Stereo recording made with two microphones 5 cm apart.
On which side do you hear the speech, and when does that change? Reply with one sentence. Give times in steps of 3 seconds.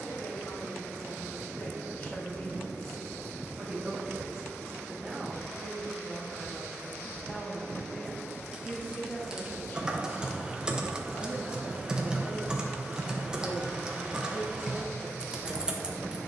You can hear the speech on the left from 0 s, in the centre from 3 s and on the left from 9 s.